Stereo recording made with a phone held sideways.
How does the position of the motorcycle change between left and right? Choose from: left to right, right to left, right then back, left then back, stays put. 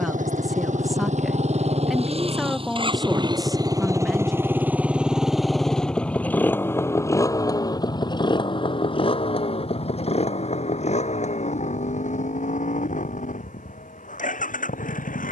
right to left.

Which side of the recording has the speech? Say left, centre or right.
centre.